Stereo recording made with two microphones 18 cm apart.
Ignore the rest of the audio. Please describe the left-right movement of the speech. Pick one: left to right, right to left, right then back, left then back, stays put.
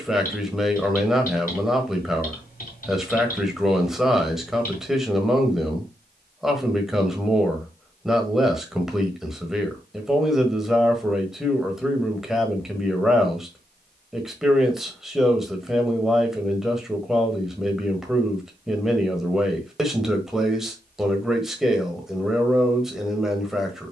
stays put.